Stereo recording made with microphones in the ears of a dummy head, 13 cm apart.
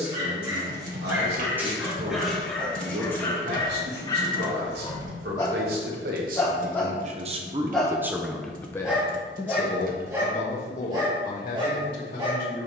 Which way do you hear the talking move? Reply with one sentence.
You can hear the talking move to the left.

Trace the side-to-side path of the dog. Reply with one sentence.
You can hear the dog go left and come back.